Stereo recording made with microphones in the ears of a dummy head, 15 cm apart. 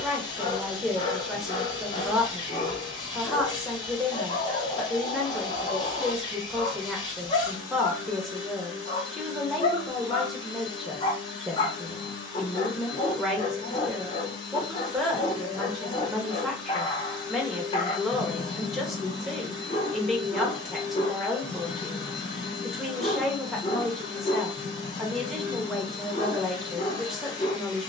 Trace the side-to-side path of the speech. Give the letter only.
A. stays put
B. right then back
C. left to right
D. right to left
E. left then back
A.